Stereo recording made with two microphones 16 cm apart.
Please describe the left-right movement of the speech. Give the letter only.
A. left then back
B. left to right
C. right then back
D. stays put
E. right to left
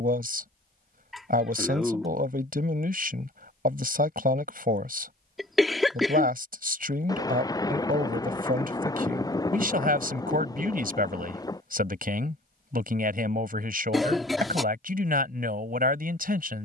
D.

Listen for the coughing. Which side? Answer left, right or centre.
centre.